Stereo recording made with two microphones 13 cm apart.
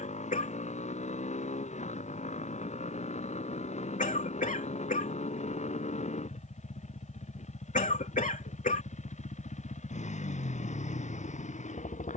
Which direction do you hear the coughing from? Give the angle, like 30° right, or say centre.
80° left.